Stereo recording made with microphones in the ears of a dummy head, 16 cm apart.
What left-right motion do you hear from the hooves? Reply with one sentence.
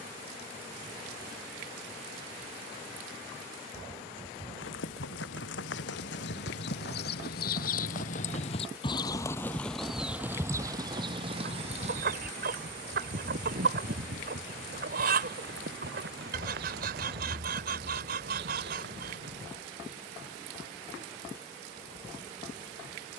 In this clip you hear the hooves move from left to right.